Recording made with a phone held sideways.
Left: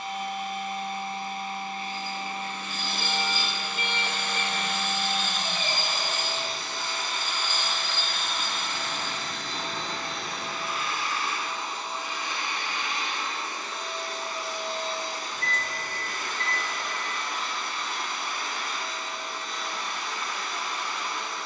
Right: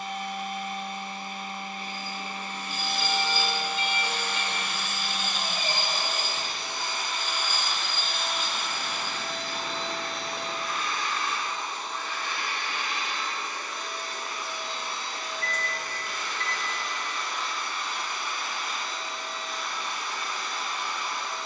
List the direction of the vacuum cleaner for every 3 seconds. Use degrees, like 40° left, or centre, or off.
40° right, 30° right, 20° right, centre, 30° left, 50° left, 70° left.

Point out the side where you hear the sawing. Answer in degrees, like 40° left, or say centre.
10° right.